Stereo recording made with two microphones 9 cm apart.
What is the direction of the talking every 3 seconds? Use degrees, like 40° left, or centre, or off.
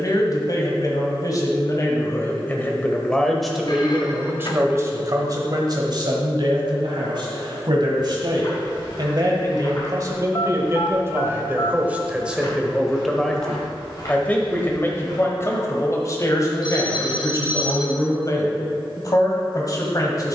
30° left, 20° right, 60° right, 30° right, 10° left, 40° left, 40° left.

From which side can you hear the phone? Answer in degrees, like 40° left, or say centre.
50° left.